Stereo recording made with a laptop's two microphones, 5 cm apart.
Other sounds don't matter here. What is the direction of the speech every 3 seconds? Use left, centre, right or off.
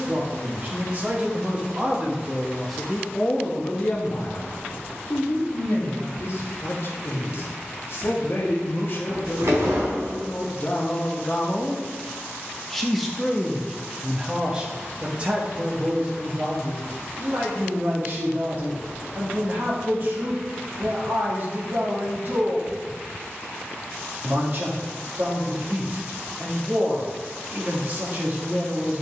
right, left, left, left, centre, right, right, right, right, right.